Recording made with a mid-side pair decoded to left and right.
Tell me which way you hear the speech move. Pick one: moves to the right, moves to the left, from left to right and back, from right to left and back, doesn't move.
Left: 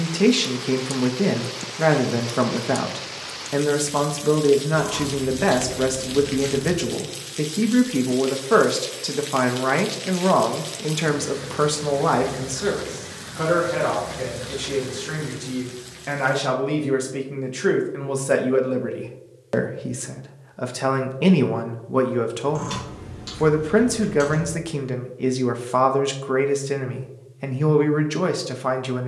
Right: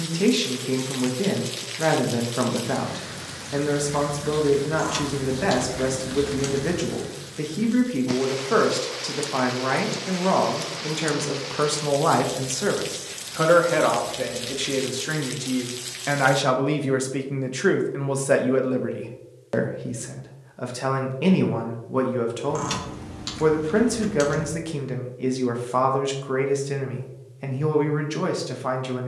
from left to right and back.